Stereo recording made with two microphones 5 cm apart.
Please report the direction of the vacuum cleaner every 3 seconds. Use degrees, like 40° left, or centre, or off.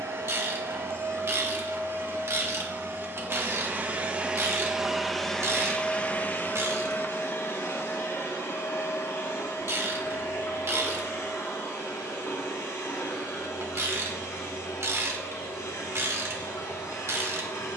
60° right, 10° right, 50° left, 70° left, 80° left, 80° left.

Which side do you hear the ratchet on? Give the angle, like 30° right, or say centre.
60° right.